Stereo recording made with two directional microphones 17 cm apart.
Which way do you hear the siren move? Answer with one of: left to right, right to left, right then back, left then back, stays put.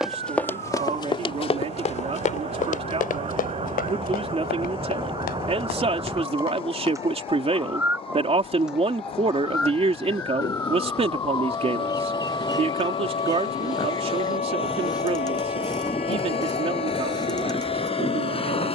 right to left.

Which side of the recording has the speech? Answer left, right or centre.
right.